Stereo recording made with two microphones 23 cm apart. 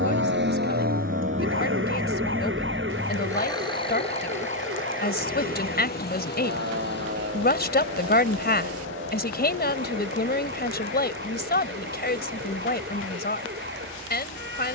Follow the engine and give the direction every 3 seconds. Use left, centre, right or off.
right, left, left, left, left.